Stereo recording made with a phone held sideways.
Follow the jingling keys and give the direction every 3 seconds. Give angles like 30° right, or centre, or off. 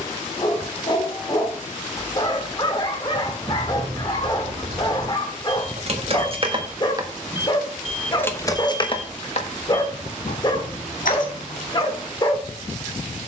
off, 60° right, 10° right, 60° left, off.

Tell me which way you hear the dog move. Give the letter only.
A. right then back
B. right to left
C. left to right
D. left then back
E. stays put
E.